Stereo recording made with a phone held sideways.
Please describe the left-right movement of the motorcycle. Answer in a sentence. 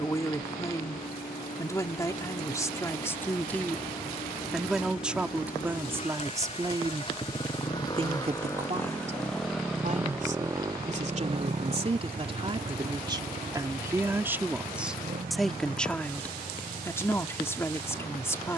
You can hear the motorcycle move from left to right.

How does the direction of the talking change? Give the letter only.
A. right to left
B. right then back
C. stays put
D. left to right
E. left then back
B.